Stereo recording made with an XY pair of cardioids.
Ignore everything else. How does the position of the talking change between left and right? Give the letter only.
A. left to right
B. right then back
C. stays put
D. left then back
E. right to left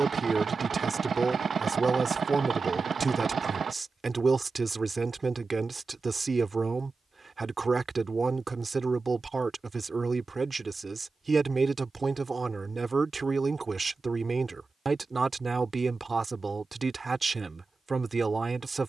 C.